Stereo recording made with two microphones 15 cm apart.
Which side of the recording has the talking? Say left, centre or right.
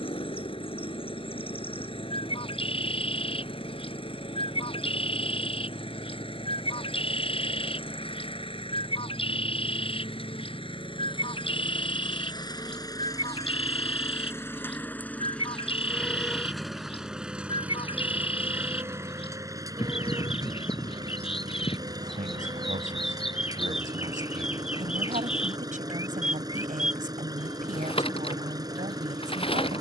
right.